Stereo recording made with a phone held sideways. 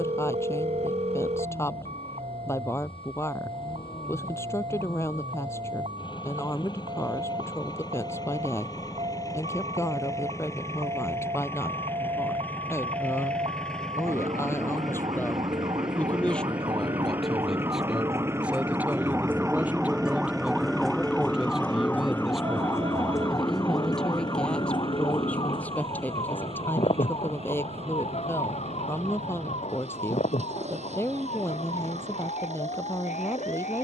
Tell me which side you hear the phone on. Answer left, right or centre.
right.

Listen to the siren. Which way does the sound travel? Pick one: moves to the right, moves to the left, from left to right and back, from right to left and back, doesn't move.
moves to the left.